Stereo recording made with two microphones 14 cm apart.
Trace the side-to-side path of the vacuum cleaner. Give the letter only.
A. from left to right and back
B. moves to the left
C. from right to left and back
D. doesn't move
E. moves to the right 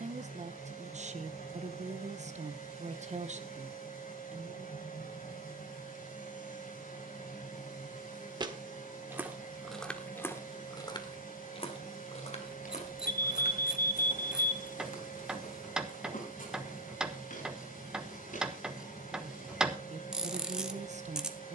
D.